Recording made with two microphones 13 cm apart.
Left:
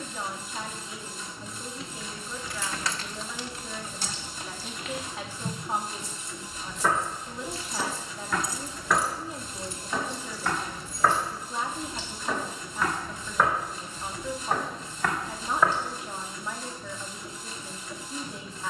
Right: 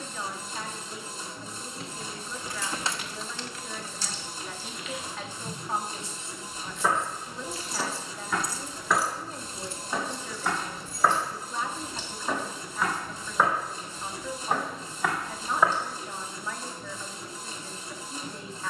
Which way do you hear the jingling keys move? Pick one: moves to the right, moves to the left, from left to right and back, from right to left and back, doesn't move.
from right to left and back.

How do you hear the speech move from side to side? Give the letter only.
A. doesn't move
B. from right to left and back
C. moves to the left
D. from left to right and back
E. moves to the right
A.